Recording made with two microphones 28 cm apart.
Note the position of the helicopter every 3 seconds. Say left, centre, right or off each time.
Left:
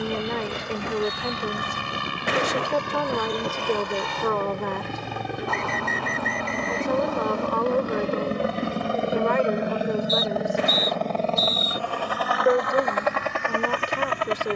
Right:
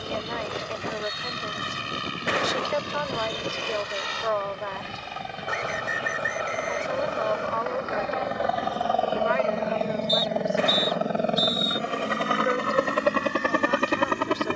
left, left, left, centre, right.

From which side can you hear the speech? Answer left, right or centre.
left.